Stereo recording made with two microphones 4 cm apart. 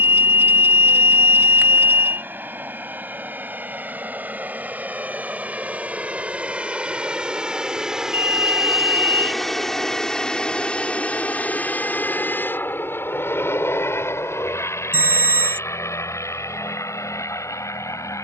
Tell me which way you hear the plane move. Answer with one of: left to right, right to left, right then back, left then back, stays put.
right to left.